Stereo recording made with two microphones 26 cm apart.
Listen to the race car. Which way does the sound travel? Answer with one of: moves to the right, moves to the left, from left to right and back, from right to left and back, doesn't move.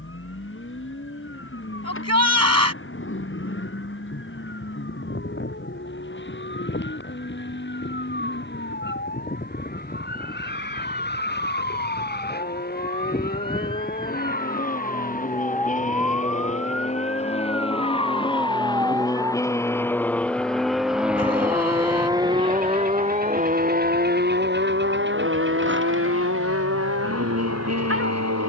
moves to the right.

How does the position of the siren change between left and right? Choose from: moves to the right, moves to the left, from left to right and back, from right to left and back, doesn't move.
moves to the right.